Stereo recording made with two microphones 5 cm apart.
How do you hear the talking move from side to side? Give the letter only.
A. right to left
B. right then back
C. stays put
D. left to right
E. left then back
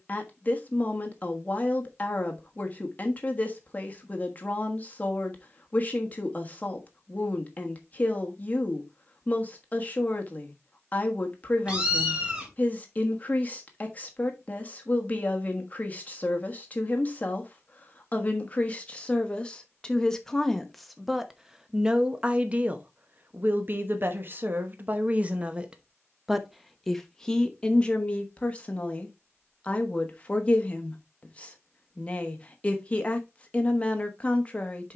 B.